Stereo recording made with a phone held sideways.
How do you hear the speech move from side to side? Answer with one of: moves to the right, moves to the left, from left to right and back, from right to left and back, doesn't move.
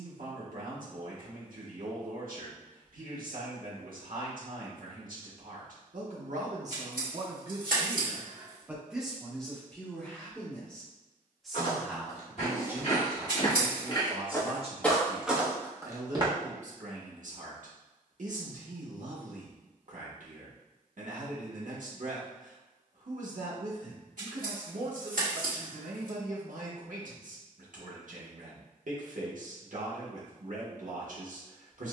from right to left and back.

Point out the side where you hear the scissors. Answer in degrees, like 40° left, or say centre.
70° right.